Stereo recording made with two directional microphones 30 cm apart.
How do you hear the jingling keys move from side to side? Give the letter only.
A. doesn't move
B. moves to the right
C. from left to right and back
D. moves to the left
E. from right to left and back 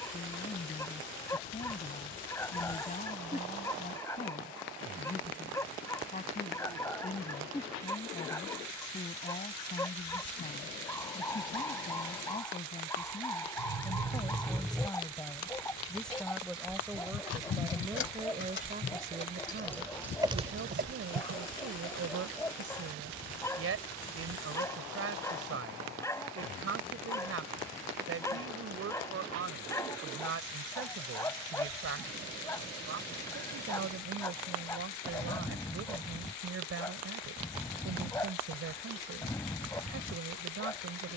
E.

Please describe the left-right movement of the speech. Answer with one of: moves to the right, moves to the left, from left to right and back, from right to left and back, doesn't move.
moves to the right.